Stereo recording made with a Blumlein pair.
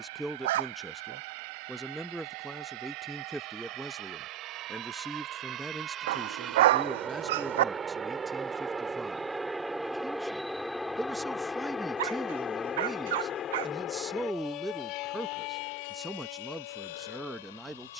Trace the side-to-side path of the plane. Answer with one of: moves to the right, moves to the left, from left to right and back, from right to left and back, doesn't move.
moves to the left.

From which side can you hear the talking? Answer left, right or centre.
centre.